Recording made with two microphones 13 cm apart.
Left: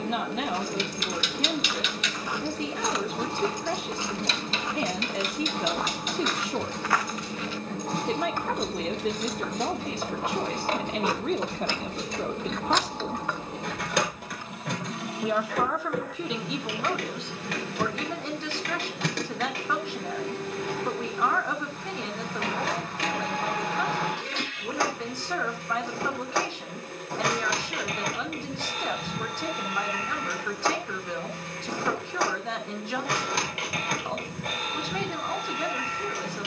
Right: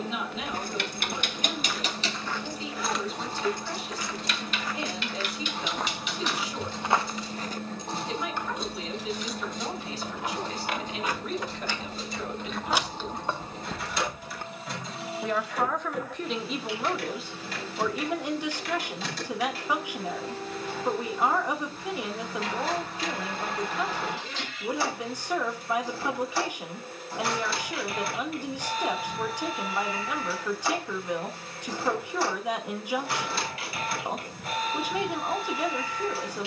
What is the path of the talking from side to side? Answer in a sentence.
In this clip you hear the talking travel towards the right.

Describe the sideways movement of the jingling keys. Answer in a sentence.
You can hear the jingling keys move from right to left and back again.